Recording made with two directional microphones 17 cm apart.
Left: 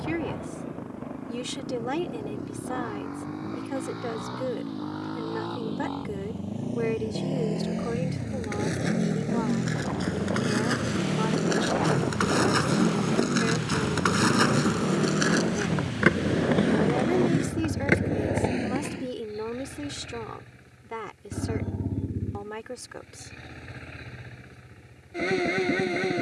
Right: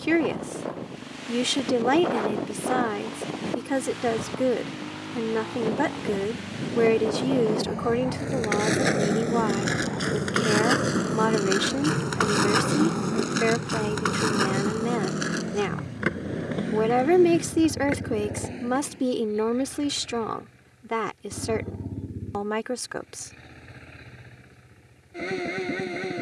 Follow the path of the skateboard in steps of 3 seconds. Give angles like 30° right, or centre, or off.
off, off, 50° right, 40° right, centre, 40° left, 50° left, off, off.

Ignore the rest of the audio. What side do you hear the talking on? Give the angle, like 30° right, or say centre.
50° right.